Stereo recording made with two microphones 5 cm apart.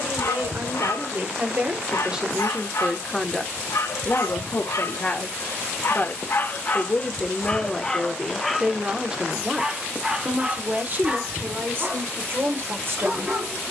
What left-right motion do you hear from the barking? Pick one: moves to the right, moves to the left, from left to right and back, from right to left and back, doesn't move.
moves to the right.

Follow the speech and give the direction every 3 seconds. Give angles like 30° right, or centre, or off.
30° right, 30° left, centre, 30° right, 50° right.